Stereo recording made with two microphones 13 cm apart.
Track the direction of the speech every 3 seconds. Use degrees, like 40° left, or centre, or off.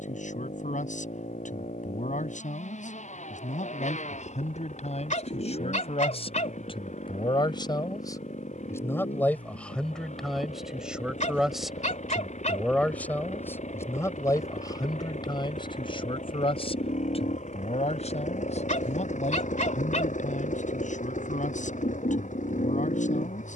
70° left, 60° left, 30° left, centre, 20° left, 40° left, 60° left, 70° left.